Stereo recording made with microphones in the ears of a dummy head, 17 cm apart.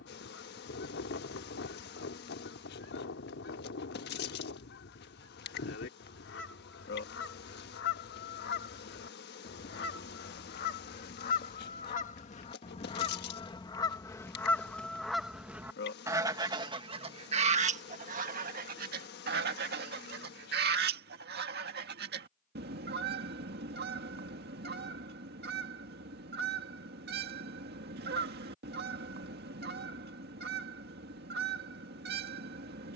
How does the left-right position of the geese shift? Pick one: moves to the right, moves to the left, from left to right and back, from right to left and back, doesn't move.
moves to the right.